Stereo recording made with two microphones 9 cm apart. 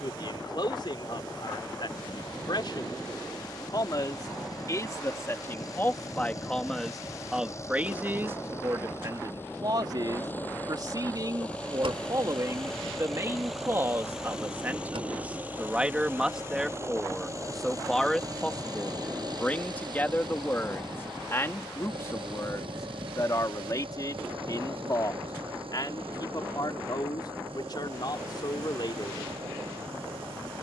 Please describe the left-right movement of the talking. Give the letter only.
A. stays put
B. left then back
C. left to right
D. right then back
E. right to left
D.